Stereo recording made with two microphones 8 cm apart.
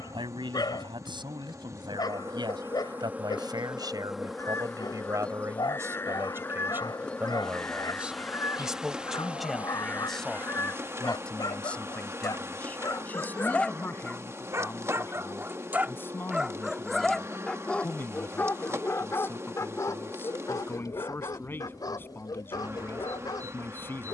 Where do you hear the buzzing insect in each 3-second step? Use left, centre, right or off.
right, centre, centre, right, right, right, right, right.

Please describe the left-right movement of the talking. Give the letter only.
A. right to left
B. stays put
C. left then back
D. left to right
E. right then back
A.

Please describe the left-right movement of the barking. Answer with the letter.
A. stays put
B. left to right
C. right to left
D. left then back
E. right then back
E.